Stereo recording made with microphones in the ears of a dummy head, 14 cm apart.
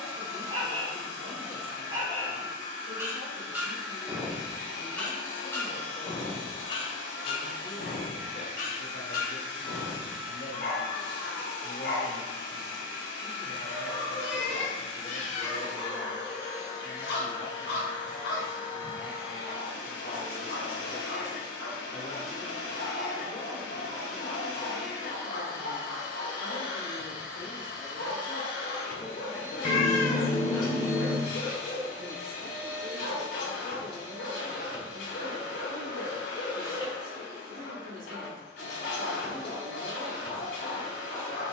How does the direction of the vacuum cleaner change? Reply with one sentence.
In this clip you hear the vacuum cleaner stay in one place.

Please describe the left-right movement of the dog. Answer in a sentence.
In this clip you hear the dog travel towards the left.